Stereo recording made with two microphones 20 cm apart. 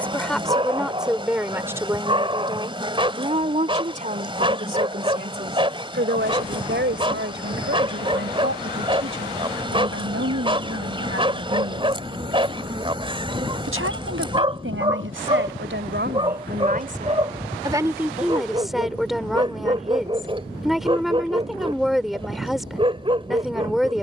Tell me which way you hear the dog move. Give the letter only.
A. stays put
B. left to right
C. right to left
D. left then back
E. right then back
A.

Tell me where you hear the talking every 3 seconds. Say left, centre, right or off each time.
centre, right, right, right, right, right, centre, centre.